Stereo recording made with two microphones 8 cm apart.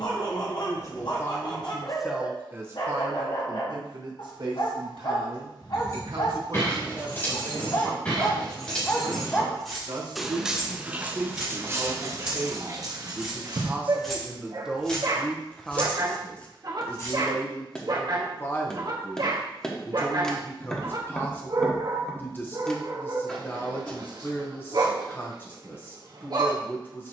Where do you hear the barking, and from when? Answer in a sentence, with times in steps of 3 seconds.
In this clip you hear the barking on the left from 0 s, in the centre from 9 s and on the right from 12 s.